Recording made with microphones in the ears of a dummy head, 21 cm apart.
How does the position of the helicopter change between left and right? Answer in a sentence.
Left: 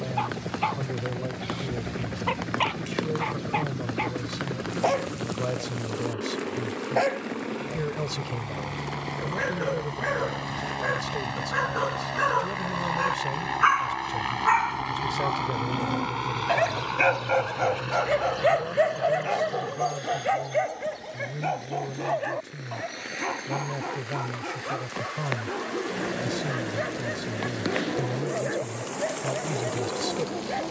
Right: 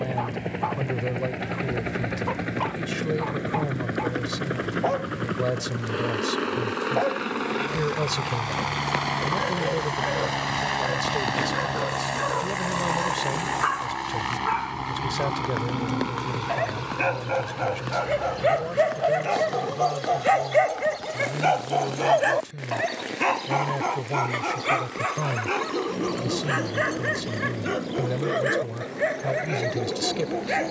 In this clip you hear the helicopter move to the left.